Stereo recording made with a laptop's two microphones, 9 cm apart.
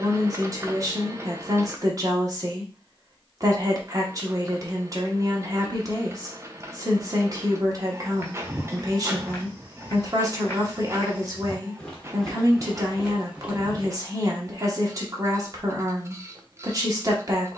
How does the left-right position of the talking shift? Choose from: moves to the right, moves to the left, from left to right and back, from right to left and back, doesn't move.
doesn't move.